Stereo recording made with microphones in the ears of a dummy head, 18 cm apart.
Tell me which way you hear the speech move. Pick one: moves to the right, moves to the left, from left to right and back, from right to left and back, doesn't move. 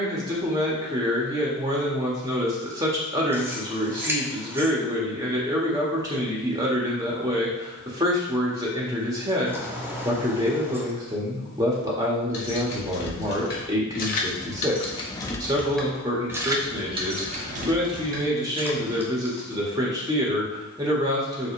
doesn't move.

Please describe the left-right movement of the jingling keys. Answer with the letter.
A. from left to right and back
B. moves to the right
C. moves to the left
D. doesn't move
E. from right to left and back
B.